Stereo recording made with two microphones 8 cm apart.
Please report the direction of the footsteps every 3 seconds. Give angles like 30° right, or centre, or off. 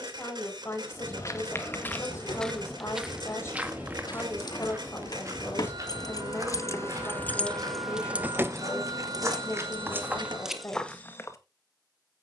20° left, 30° right, 50° right, 10° right.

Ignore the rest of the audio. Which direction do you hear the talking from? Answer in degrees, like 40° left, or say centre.
30° left.